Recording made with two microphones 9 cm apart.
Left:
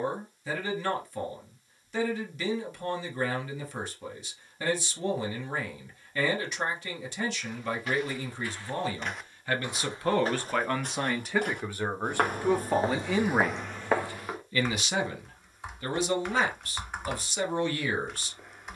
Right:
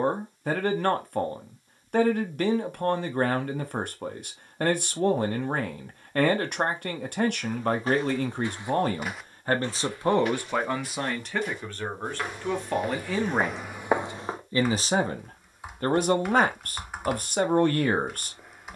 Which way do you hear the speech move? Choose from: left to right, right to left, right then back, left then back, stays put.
left then back.